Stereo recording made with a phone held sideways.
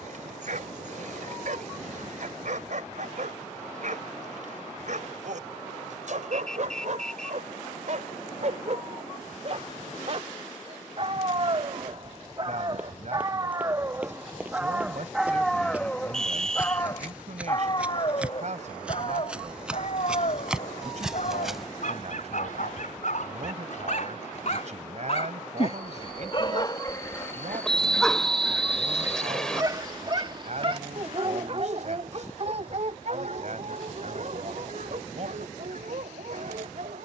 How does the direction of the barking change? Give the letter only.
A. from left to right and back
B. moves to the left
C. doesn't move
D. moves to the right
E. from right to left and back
E.